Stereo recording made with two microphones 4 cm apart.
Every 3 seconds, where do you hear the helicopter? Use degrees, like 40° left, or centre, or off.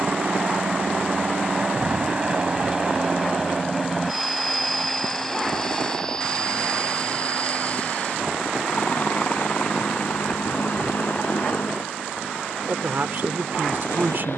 30° right, centre, 30° left, 40° left, 50° left.